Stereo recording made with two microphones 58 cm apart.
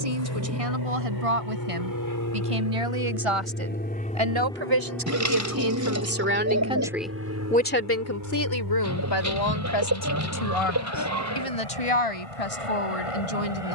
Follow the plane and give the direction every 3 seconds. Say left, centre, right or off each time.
left, centre, right, right, right.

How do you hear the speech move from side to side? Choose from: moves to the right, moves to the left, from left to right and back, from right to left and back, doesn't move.
moves to the left.